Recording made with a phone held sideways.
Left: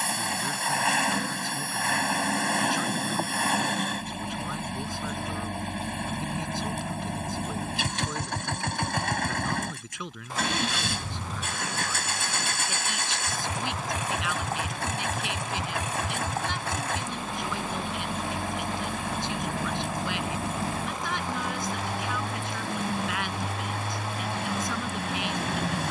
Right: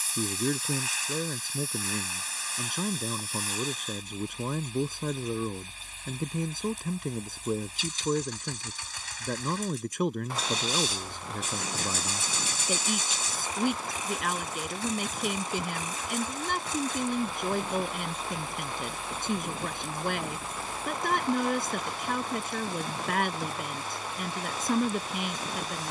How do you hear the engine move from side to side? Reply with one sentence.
You can hear the engine stay put.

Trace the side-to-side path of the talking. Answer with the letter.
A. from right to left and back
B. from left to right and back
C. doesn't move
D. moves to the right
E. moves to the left
C.